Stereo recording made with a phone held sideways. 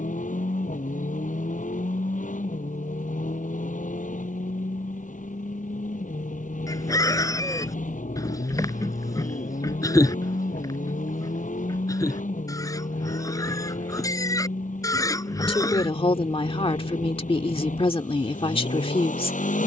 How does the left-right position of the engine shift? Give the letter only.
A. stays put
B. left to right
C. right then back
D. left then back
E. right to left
A.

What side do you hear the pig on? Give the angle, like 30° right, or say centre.
20° left.